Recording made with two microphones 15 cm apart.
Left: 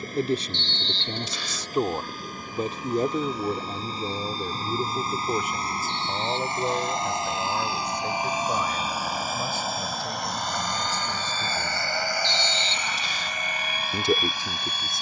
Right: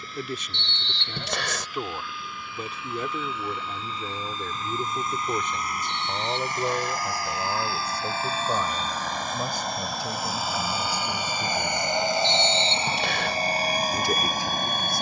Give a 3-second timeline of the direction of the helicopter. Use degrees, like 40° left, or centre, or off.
50° left, 40° left, 20° left, 10° right, 30° right.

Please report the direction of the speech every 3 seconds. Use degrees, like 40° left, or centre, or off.
30° left, 20° left, 10° right, 10° right, 20° left.